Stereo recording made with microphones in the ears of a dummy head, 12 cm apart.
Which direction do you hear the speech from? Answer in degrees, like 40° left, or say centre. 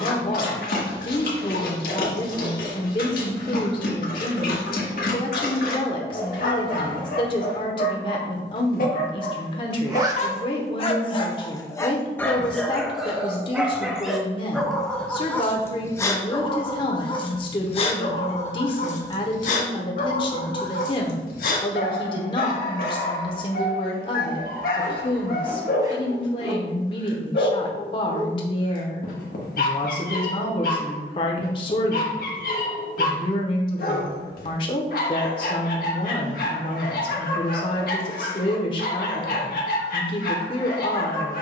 40° left.